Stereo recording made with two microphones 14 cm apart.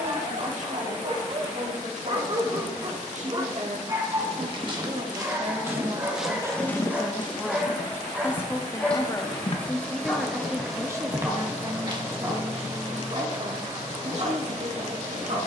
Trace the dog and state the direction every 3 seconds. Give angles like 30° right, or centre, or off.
40° right, 20° right, centre, centre, 30° right.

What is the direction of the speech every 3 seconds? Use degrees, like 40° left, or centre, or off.
60° right, 50° right, centre, 10° right, 50° right.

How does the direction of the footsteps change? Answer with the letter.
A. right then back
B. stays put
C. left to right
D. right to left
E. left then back
E.